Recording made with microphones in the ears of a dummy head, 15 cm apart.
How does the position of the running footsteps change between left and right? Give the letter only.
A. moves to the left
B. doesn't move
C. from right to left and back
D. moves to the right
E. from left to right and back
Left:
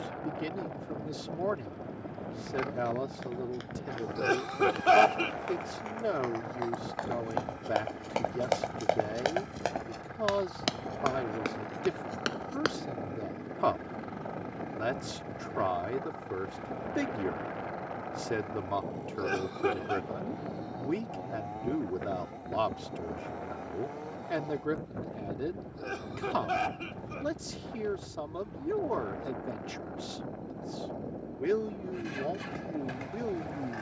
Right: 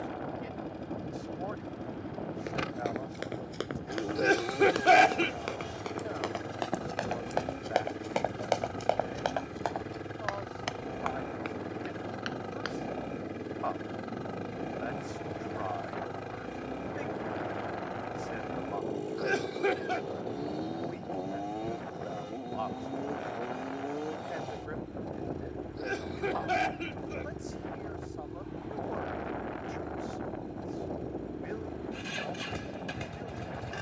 A.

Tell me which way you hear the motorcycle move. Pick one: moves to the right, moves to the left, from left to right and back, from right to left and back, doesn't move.
doesn't move.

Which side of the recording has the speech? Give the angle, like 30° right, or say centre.
80° left.